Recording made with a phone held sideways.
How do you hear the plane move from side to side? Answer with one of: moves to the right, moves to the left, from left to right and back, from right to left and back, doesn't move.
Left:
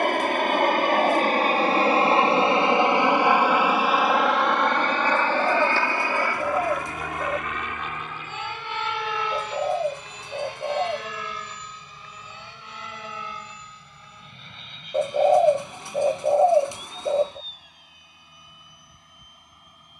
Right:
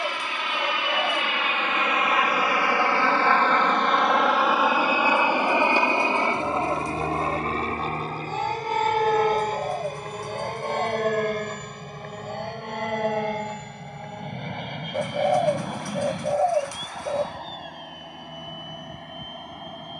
moves to the right.